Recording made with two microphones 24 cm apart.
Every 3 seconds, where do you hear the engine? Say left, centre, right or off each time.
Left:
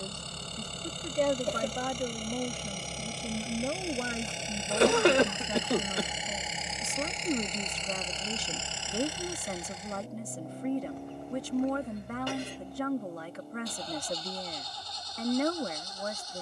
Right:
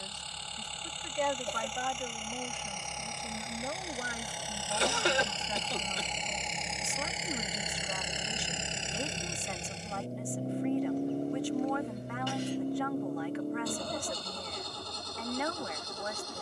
left, left, centre, right, right, right.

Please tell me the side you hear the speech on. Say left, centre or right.
left.